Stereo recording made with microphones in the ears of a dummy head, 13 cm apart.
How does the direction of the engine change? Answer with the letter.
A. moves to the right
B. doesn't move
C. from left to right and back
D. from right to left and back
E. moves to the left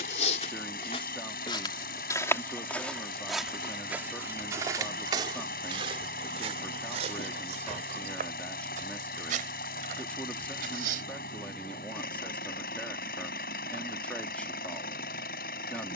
B.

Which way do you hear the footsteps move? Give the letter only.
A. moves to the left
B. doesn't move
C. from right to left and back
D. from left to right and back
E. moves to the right
E.